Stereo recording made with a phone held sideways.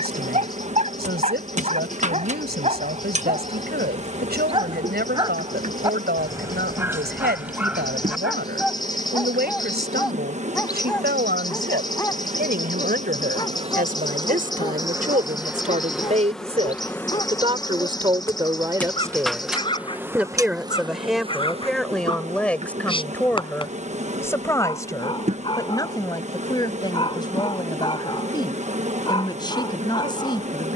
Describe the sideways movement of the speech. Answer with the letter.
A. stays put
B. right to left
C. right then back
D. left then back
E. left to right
B.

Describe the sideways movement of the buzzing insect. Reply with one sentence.
In this clip you hear the buzzing insect go left and come back.